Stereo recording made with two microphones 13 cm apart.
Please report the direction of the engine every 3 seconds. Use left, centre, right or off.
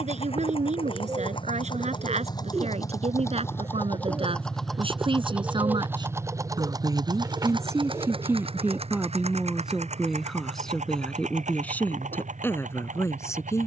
left, centre, right, right, right.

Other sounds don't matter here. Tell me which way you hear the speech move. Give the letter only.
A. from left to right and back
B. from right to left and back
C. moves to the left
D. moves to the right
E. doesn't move
C.